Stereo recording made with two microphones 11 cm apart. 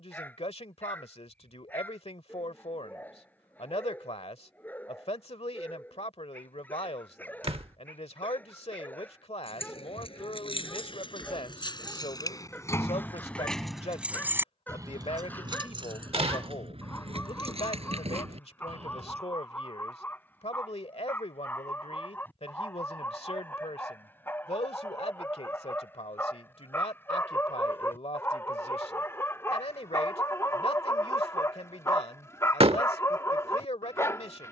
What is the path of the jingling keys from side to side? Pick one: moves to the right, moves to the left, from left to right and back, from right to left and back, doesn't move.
moves to the right.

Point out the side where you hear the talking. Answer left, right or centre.
left.